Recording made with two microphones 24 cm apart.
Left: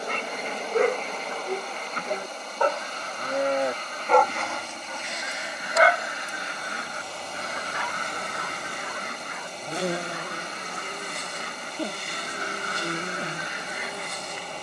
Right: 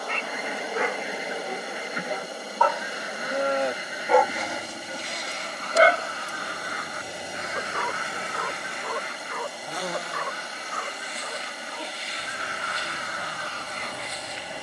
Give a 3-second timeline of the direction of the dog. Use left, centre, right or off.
left, centre, right, right, right.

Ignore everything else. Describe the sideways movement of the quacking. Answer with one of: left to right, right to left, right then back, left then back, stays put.
left then back.